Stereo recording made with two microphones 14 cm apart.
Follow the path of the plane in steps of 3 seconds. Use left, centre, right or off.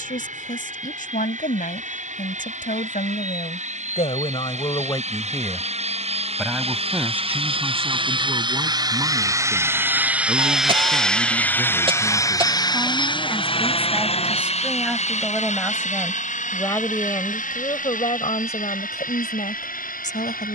right, right, right, centre, left, left, left.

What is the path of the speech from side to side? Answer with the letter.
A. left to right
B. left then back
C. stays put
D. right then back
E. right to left
D.